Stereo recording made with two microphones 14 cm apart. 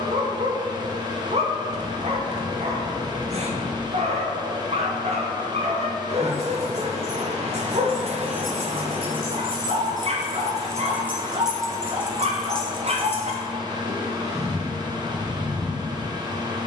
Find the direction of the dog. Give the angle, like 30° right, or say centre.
50° right.